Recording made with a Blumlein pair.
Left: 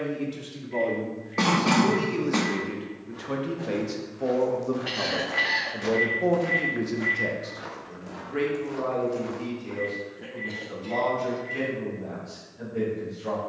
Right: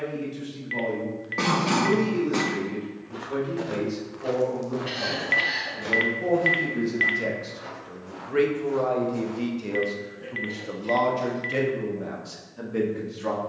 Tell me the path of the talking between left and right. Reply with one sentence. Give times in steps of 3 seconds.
You can hear the talking on the left from 0 s, in the centre from 6 s and on the right from 9 s.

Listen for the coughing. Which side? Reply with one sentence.
In this clip you hear the coughing in the centre.